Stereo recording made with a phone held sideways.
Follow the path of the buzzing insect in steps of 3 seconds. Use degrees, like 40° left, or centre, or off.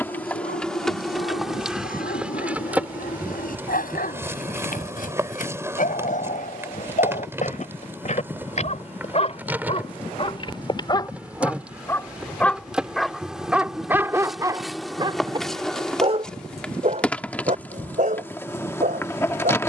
centre, 20° right, 10° right, 10° right, centre, 10° left, 20° left.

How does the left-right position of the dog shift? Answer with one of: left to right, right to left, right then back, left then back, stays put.
left to right.